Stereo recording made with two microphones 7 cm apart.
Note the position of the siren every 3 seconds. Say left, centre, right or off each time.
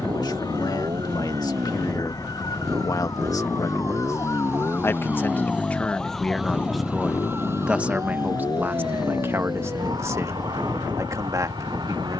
left, left, right, right.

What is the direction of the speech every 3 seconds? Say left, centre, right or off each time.
left, left, centre, right.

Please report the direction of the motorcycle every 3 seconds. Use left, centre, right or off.
right, right, left, left.